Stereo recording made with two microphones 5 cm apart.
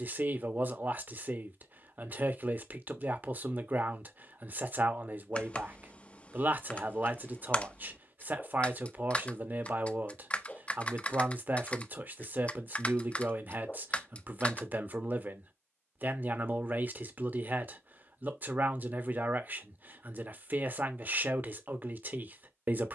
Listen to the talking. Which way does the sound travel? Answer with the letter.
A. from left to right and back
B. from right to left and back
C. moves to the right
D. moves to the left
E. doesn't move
E.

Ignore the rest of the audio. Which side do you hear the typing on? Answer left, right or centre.
left.